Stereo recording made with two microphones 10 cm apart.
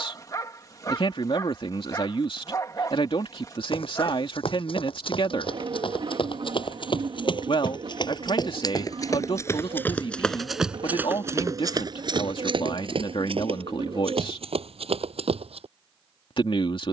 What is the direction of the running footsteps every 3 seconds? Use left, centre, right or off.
off, left, left, centre, right, right.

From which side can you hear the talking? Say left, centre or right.
left.